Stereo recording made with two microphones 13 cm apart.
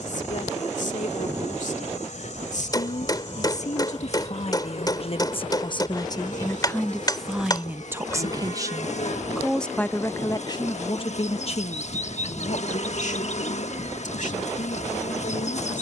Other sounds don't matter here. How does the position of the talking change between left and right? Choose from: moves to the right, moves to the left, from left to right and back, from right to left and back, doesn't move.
from left to right and back.